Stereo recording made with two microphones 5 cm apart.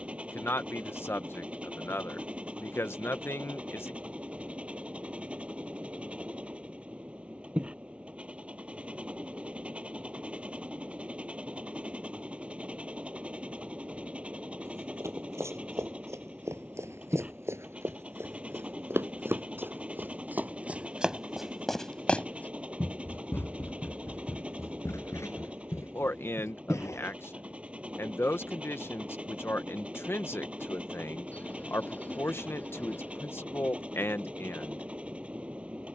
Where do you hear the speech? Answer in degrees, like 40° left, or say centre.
50° left.